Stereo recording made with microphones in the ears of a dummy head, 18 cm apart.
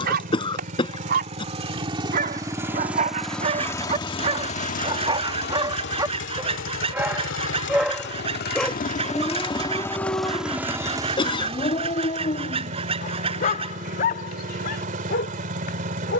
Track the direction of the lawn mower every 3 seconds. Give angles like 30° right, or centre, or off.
30° right, 30° left, 60° left, centre, 40° right, 40° right.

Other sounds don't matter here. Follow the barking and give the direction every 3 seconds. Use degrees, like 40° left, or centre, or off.
50° right, 30° right, 10° right, 20° left, 40° left, 50° left.